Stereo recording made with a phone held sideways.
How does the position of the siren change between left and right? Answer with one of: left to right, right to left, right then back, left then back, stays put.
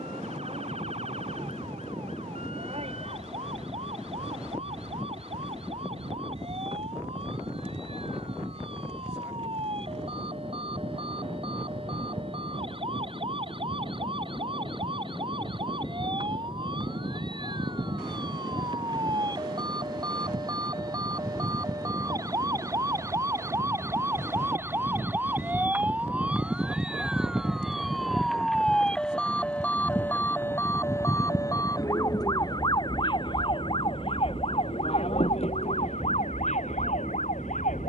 right to left.